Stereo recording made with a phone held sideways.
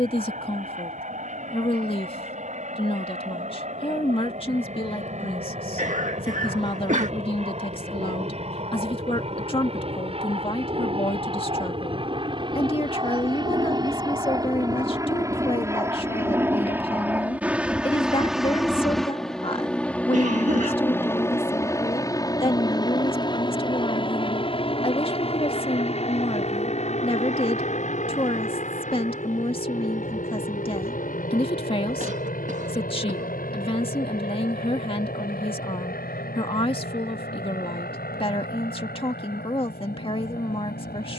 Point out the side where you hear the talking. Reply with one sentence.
You can hear the talking on the left.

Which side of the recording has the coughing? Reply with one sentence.
You can hear the coughing on the right.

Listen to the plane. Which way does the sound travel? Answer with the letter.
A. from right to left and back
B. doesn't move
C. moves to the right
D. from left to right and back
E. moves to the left
E.